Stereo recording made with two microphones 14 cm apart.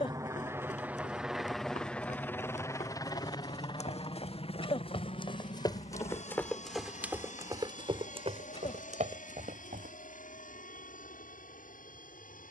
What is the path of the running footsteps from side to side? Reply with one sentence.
In this clip you hear the running footsteps go from the left side to the right.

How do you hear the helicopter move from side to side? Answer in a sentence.
You can hear the helicopter move from right to left.